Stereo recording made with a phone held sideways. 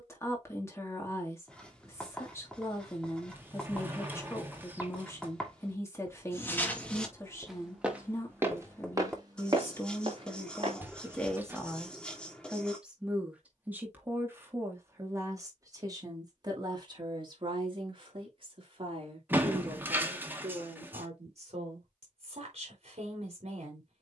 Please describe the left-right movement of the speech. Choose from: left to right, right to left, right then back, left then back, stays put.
left to right.